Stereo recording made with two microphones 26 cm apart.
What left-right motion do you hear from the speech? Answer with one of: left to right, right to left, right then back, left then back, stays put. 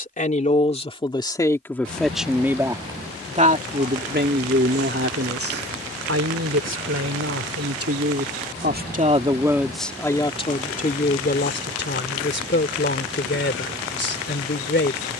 right then back.